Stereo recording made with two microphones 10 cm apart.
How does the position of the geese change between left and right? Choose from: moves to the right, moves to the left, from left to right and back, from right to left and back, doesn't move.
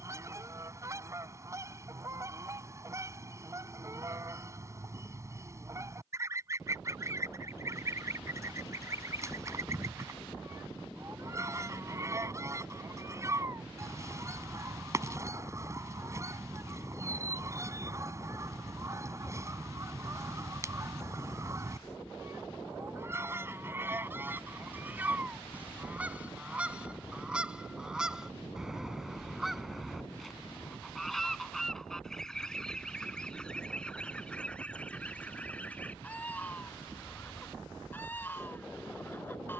moves to the left.